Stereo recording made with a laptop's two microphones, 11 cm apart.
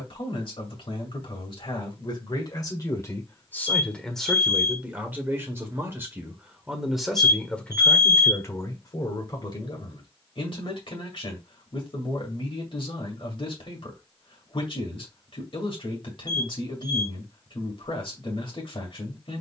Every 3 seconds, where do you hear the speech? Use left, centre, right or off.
left, centre, centre, left, left, left, left.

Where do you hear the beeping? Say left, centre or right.
left.